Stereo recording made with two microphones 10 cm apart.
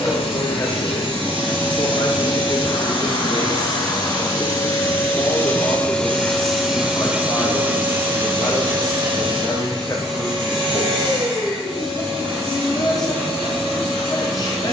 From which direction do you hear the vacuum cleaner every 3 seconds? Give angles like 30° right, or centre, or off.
60° left, 30° left, 20° right, 50° right, 60° right.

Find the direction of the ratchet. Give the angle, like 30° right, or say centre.
50° right.